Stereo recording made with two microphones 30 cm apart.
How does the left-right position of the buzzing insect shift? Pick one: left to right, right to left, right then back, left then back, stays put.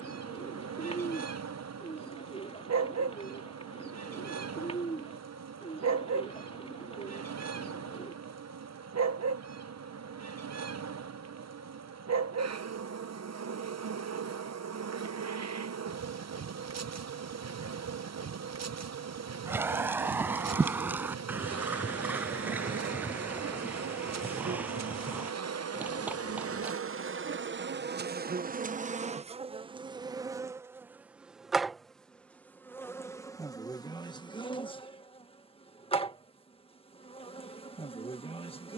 right to left.